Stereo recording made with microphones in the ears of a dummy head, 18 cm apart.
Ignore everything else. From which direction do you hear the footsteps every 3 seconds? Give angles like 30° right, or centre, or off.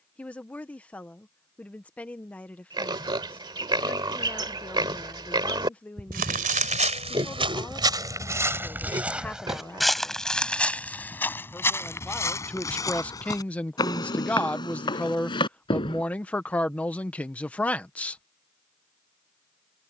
off, off, 30° right, centre, 20° left, 20° left, off.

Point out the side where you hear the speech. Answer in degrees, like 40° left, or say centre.
10° left.